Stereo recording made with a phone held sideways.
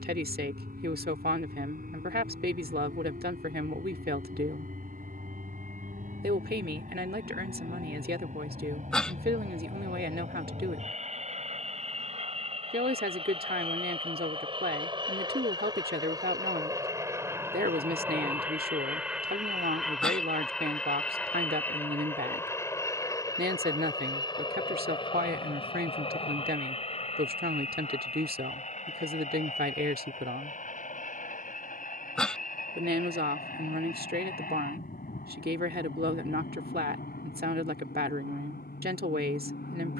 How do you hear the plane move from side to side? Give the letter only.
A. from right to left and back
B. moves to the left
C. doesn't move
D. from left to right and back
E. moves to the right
B.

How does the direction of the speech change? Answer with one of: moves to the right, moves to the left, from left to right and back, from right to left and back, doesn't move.
doesn't move.